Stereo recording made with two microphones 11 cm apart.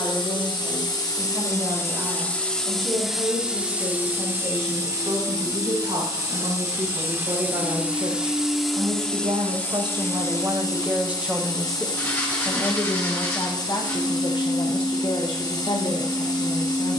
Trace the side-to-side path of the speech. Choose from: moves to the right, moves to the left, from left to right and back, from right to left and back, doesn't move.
moves to the left.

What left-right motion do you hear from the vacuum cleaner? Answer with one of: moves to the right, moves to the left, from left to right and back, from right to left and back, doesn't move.
from left to right and back.